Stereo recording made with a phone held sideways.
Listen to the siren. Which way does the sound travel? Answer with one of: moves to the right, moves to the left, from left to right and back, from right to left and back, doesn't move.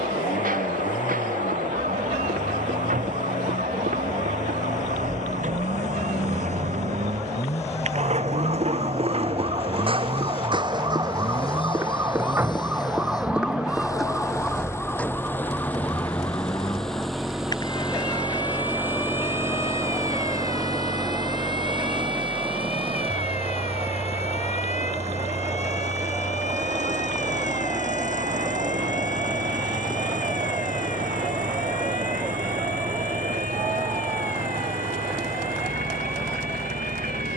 moves to the left.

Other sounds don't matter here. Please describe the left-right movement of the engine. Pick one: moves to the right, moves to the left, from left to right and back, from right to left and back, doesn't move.
moves to the right.